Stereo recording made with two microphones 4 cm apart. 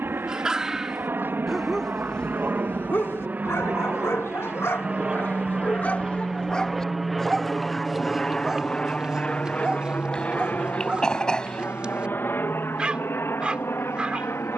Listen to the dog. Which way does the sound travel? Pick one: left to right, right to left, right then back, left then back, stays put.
left then back.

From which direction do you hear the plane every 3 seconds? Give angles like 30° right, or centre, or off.
50° right, 30° right, centre, 40° left, 50° left.